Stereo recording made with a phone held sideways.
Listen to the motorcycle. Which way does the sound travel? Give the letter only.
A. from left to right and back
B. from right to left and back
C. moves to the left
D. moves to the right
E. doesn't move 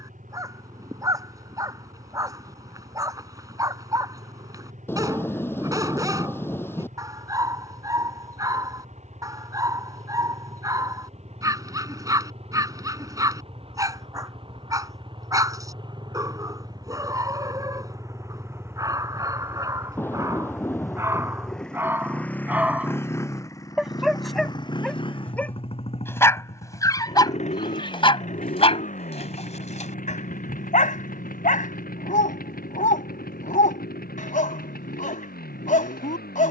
C.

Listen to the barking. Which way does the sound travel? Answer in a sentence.
You can hear the barking move from right to left.